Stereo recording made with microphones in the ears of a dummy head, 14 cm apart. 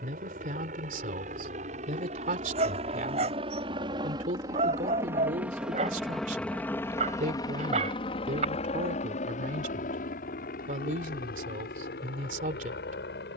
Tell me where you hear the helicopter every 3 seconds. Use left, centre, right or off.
right, right, left, left, left.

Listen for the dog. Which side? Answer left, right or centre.
right.